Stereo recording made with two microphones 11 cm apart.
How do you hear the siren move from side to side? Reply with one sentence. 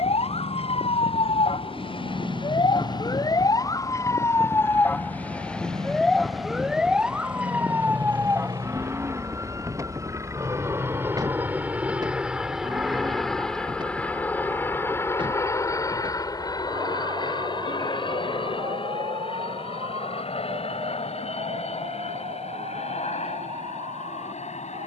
In this clip you hear the siren move to the right.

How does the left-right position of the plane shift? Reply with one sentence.
In this clip you hear the plane move from right to left.